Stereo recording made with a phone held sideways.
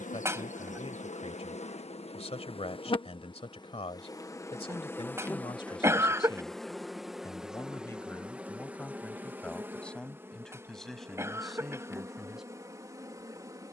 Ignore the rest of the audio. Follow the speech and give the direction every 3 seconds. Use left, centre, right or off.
left, left, left, centre, centre.